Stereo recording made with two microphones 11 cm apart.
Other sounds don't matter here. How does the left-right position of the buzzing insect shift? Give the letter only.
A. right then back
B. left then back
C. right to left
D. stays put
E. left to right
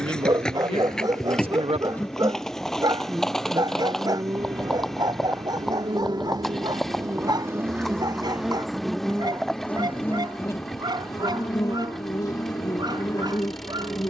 A.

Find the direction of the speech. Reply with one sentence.
You can hear the speech on the right.